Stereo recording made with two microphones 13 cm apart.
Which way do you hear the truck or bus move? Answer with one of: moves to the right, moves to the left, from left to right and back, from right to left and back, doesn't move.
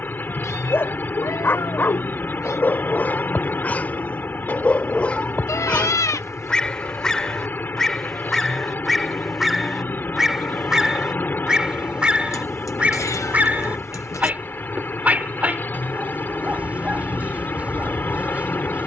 doesn't move.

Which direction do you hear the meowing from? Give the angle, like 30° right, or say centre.
30° left.